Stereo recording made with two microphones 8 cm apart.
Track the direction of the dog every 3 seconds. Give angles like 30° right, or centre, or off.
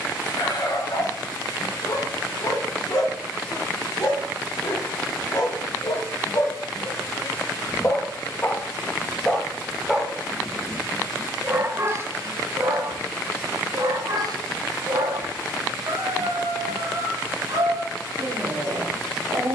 60° left, 50° left, 30° left, 10° right, 50° right, 70° right, 80° right.